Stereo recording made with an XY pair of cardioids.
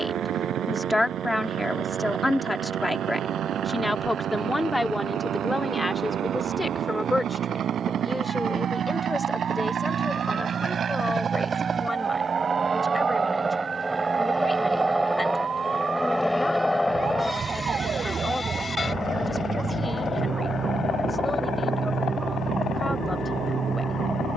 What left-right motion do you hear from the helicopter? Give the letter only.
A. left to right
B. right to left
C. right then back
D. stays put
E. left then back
B.